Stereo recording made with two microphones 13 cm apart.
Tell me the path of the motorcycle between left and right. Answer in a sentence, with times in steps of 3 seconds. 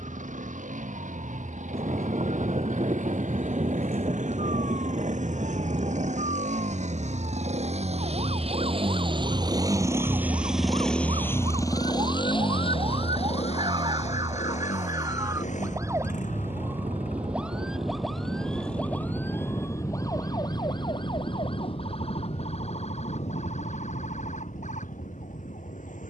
You can hear the motorcycle on the right from 0 s, in the centre from 9 s and on the left from 12 s.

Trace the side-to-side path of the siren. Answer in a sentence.
You can hear the siren move to the left.